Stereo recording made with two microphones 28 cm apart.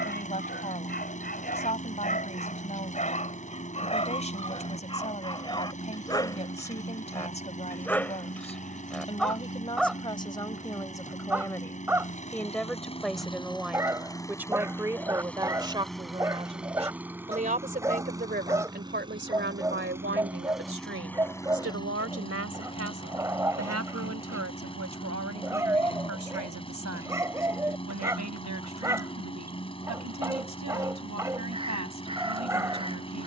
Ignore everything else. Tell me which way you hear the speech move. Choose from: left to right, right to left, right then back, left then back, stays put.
left to right.